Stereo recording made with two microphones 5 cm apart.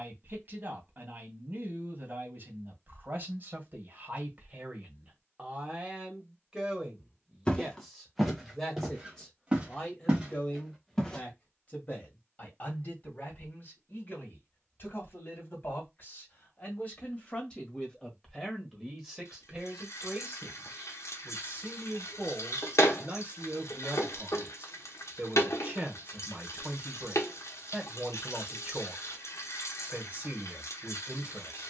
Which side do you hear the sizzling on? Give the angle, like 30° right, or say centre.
80° left.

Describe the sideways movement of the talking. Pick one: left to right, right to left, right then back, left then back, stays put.
left then back.